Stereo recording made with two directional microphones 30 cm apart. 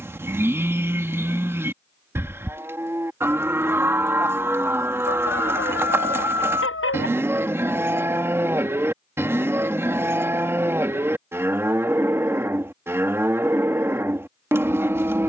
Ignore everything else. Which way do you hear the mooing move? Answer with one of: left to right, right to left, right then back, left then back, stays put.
stays put.